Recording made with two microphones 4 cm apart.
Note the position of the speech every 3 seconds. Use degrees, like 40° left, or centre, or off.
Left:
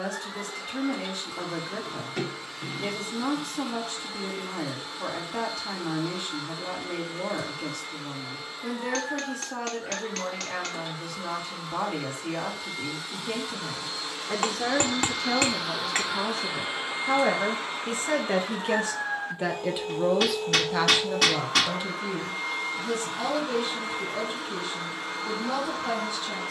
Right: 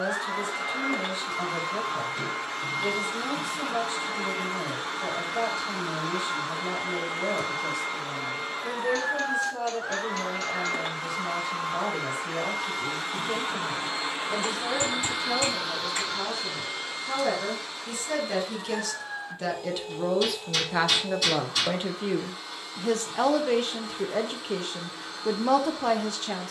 50° left, 50° left, 50° left, 50° left, 50° left, 50° left, 10° left, 50° right, 60° right.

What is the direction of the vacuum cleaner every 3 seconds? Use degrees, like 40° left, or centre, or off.
60° right, 60° right, 60° right, 60° right, 40° right, 10° left, 40° left, 50° left, 50° left.